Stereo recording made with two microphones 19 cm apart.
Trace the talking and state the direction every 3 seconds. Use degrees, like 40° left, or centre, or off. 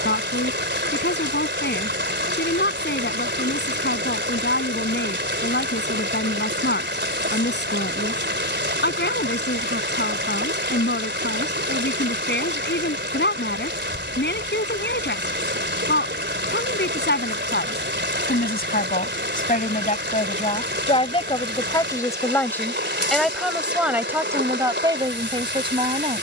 60° left, 60° left, 60° left, 60° left, 60° left, 60° left, 40° left, 10° left, 20° right.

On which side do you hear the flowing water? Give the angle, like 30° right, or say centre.
60° right.